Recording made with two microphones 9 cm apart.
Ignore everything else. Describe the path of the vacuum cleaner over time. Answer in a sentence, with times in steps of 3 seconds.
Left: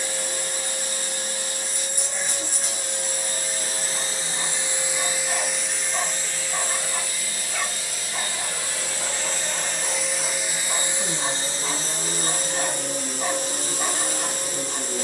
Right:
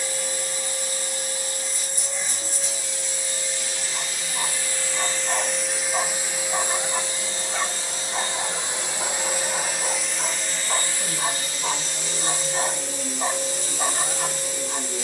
In this clip you hear the vacuum cleaner on the left from 0 s, on the right from 6 s, in the centre from 9 s and on the left from 12 s.